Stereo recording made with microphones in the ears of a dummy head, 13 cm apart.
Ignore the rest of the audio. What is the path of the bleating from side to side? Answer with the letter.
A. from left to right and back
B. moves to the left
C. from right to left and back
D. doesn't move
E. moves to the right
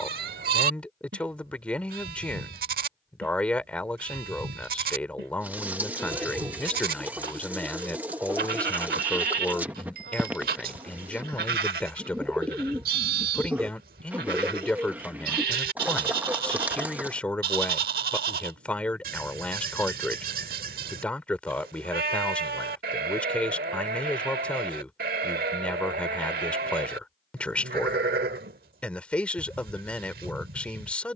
D.